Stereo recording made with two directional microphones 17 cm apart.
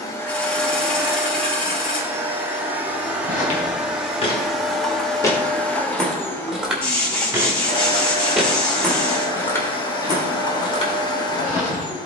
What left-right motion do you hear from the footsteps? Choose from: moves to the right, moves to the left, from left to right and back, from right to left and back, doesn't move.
from left to right and back.